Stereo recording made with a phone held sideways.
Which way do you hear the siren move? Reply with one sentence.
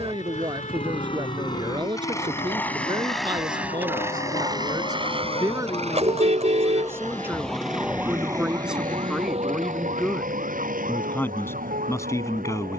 You can hear the siren travel towards the right.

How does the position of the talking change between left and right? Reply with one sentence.
You can hear the talking move from right to left.